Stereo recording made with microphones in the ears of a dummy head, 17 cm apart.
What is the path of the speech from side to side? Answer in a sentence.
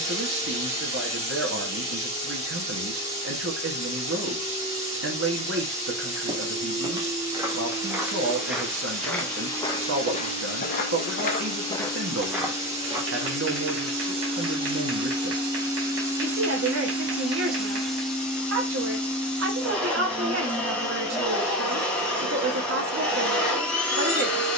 You can hear the speech stay put.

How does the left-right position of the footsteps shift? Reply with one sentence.
You can hear the footsteps go left and come back.